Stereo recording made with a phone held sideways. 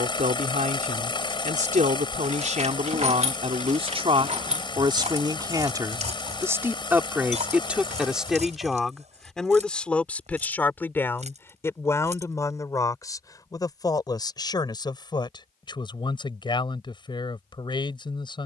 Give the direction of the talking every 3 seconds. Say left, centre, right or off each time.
right, right, centre, centre, left, left.